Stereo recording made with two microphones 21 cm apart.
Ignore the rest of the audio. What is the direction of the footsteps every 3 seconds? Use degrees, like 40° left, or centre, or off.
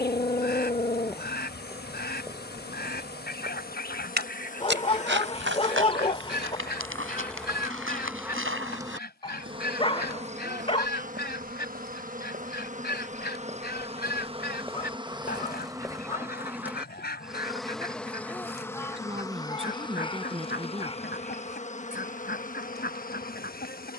10° right, 60° right, 80° right, 60° right, 30° right, centre, off, off.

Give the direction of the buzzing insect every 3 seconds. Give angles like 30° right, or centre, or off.
50° left, 40° left, centre, 40° right, 30° right, 10° right, 20° left, 40° left.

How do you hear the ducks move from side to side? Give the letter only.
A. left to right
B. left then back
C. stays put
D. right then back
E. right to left
C.